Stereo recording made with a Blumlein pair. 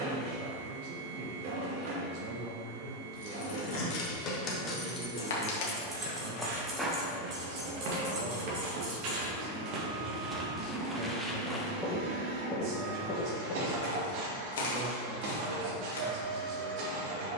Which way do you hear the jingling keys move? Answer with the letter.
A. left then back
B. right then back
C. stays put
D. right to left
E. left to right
E.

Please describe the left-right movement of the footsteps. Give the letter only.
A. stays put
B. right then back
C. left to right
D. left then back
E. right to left
B.